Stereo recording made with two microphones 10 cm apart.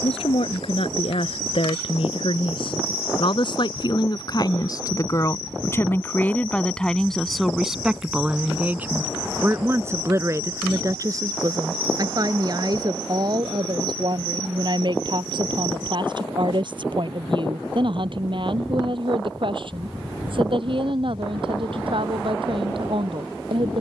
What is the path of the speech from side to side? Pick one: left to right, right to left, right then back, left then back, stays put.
left to right.